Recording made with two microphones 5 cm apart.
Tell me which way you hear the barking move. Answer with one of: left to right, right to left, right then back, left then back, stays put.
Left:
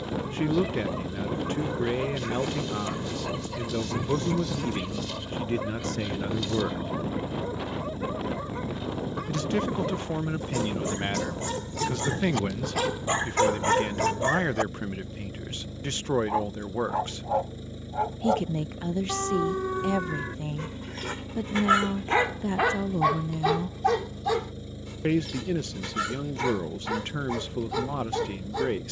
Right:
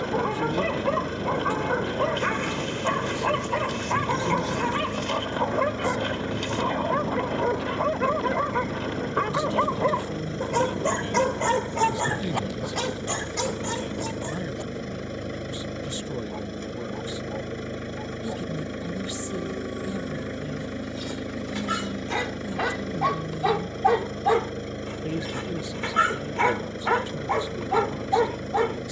left then back.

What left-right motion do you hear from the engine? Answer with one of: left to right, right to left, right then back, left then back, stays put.
stays put.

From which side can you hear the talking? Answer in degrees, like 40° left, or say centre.
50° left.